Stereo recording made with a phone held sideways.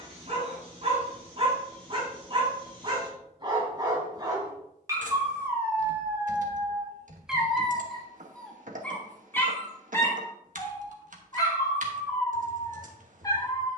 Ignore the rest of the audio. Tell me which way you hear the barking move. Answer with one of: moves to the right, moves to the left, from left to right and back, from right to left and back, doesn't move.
moves to the left.